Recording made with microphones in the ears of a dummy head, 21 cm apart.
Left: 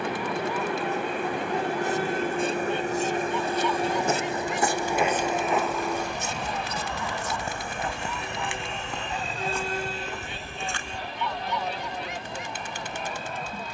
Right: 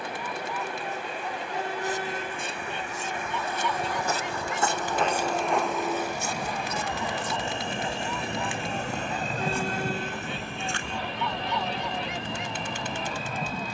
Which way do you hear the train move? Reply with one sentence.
You can hear the train travel towards the right.